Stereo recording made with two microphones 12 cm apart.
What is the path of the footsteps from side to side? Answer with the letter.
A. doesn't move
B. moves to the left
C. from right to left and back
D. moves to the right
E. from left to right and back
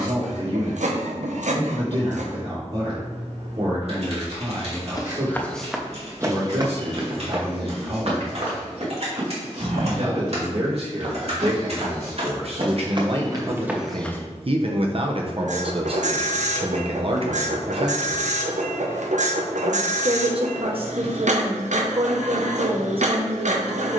E.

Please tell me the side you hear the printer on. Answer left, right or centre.
right.